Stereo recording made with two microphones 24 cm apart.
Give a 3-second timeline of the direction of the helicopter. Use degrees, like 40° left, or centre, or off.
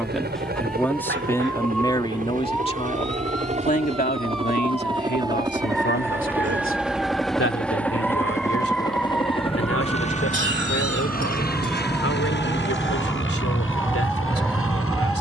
40° right, 20° right, centre, 30° left, 50° left.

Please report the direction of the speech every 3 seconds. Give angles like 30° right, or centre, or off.
10° left, 40° left, 60° left, 70° left, 70° left.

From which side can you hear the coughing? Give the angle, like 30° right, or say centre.
50° right.